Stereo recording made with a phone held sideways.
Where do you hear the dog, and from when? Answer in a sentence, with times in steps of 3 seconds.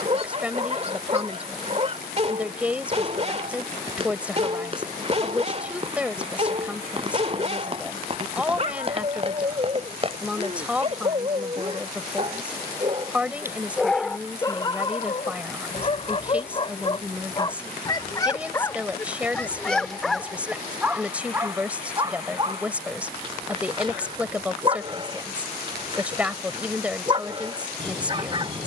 In this clip you hear the dog on the right from 0 s, in the centre from 12 s, on the left from 15 s, in the centre from 18 s and on the right from 21 s.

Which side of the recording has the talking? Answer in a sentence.
You can hear the talking in the centre.